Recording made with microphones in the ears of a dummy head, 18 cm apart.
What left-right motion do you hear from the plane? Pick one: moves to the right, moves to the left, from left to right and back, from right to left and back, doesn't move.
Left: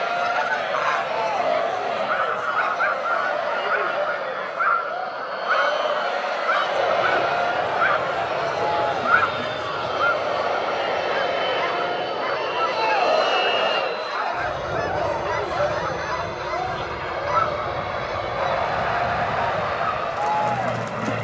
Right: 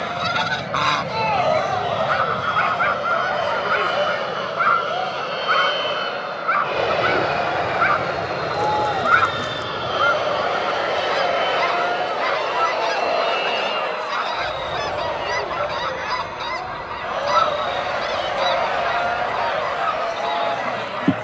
moves to the left.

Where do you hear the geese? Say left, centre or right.
right.